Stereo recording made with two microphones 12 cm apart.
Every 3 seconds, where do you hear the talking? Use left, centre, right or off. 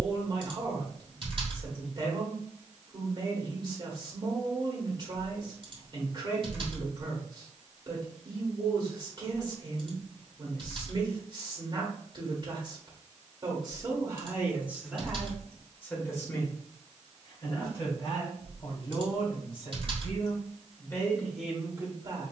right, right, right, right, right, left, left, centre.